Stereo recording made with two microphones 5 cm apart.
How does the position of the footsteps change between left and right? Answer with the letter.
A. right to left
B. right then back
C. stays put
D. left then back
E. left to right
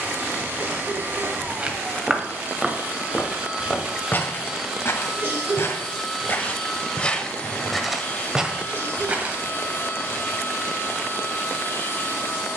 D.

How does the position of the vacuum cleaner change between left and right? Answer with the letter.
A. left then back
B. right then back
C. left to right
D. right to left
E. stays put
D.